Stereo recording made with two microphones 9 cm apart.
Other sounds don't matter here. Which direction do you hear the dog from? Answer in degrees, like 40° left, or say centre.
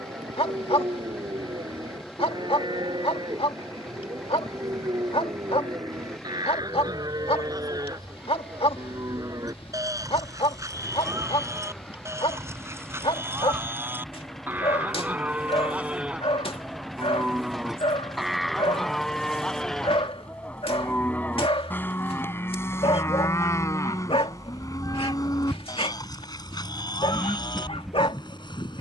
80° left.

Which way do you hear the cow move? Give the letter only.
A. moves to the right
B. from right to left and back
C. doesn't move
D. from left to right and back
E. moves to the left
E.